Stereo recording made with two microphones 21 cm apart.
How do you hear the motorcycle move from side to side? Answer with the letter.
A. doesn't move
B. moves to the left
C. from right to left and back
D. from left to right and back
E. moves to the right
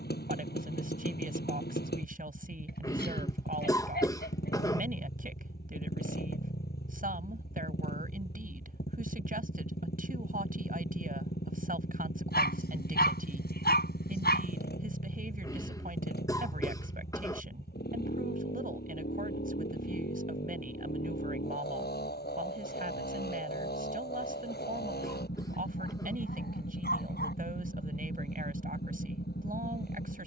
A.